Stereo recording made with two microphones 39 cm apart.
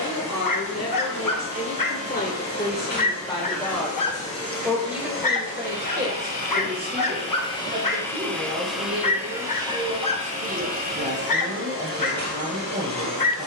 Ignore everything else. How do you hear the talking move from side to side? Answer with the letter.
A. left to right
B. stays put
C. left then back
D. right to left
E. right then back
A.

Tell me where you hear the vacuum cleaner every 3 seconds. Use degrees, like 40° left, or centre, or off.
50° left, 30° left, 10° left, 20° right, 40° right.